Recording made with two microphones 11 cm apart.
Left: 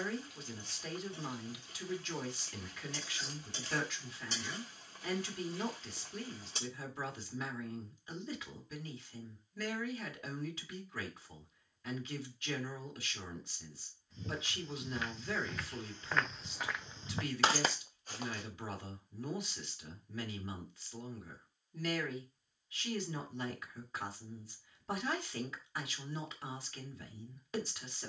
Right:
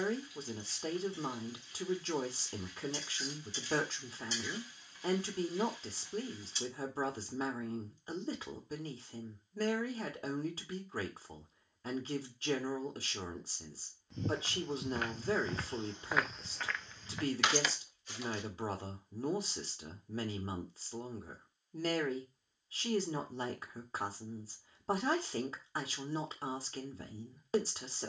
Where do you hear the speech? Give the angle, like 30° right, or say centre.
40° right.